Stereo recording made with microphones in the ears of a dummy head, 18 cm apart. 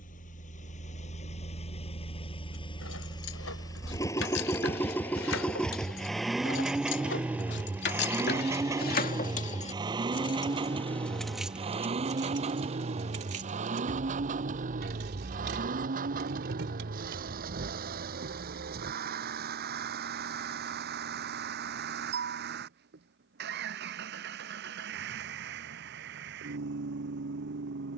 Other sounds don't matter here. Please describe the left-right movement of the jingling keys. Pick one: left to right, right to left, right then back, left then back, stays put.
left to right.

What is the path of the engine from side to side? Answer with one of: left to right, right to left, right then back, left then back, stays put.
left to right.